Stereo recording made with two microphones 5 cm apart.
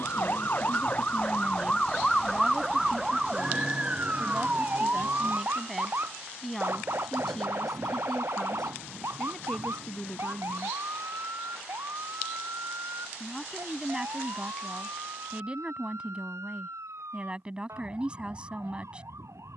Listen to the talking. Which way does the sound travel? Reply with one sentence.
You can hear the talking move from right to left and back again.